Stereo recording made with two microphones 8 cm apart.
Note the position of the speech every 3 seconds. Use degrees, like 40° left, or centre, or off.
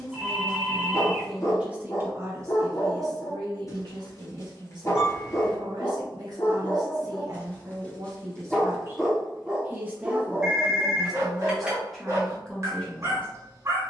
10° right, 70° right, 50° right, 10° right, 10° left.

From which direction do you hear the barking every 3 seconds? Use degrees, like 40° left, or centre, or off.
40° left, 40° left, 20° left, 20° right, 40° right.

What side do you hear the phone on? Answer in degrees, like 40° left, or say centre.
10° right.